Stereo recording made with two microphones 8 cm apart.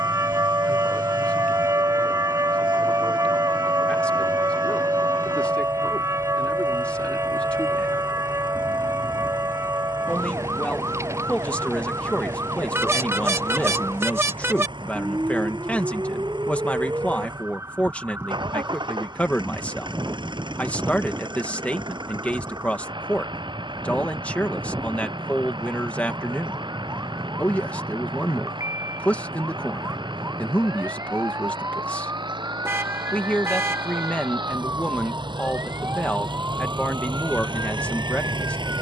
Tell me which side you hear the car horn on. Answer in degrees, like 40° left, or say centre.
30° right.